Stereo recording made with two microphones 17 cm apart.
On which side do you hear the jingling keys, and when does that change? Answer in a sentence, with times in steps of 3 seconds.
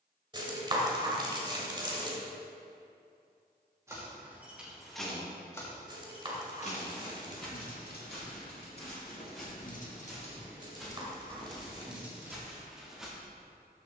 You can hear the jingling keys not at all from 0 s, in the centre from 3 s, on the left from 6 s and in the centre from 12 s.